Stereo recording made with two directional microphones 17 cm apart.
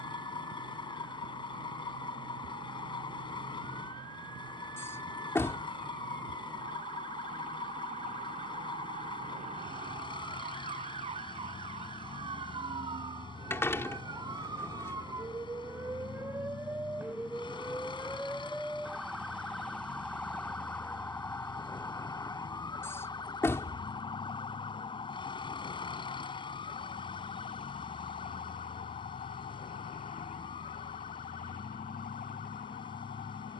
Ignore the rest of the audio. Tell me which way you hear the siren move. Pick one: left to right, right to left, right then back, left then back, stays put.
right to left.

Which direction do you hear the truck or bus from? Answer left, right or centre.
left.